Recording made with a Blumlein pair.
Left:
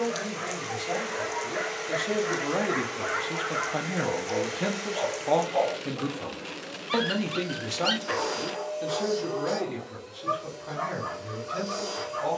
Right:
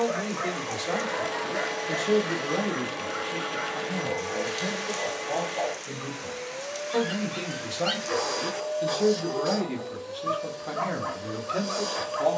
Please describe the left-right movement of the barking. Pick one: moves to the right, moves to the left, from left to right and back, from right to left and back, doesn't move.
from right to left and back.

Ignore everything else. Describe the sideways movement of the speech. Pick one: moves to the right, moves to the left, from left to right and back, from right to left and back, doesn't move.
from right to left and back.